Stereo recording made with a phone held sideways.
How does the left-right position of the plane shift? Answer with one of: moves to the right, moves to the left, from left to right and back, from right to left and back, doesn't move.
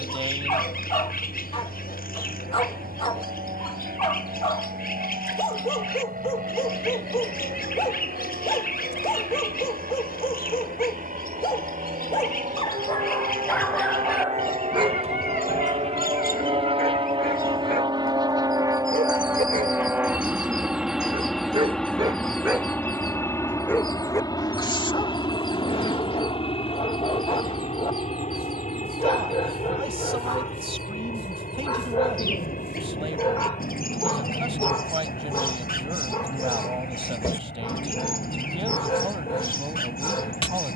moves to the left.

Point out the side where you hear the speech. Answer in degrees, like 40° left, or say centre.
40° right.